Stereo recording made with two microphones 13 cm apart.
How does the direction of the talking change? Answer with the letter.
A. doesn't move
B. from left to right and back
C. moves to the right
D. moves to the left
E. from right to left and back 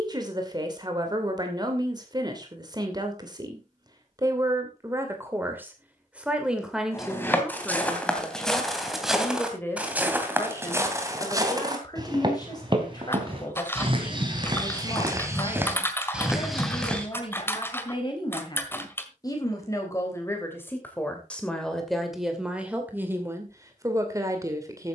E.